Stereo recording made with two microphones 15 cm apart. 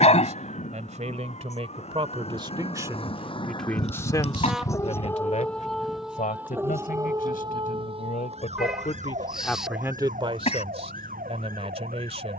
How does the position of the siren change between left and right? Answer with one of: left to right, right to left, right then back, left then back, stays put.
left to right.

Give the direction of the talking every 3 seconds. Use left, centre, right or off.
right, left, left, right.